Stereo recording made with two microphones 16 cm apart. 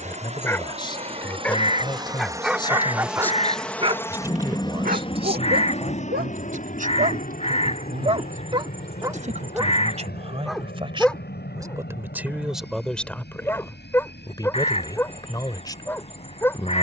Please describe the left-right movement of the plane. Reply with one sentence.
In this clip you hear the plane move from right to left.